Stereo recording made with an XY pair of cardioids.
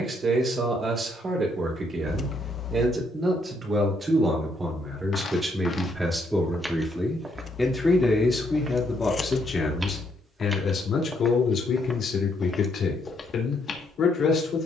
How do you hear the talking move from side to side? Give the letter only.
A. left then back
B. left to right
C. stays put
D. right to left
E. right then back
D.